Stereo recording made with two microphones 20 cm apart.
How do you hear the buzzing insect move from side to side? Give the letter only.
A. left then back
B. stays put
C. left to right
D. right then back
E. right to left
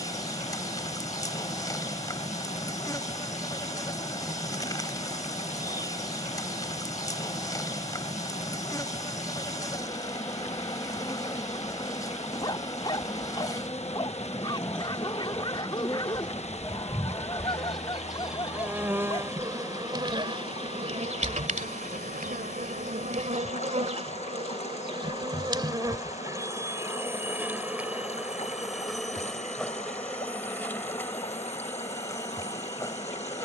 D.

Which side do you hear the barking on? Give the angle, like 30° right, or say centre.
20° left.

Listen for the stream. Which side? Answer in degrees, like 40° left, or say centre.
30° left.